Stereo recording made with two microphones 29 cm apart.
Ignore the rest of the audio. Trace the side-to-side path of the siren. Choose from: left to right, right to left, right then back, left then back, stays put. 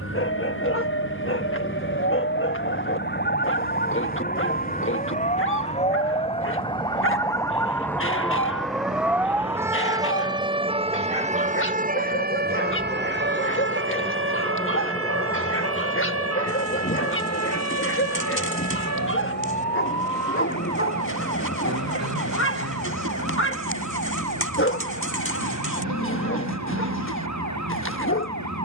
left to right.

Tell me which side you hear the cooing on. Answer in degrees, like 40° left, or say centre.
50° left.